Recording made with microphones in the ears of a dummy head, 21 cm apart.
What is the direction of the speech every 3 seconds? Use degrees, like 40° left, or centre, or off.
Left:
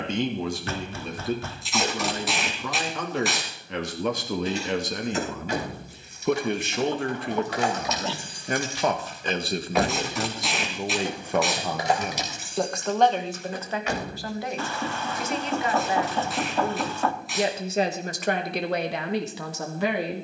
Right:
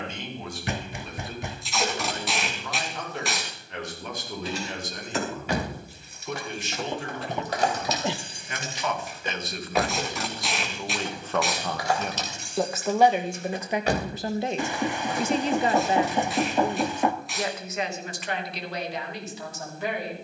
60° left, 60° left, 40° left, 20° left, 10° right, centre, 50° left.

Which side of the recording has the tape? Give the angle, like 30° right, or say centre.
centre.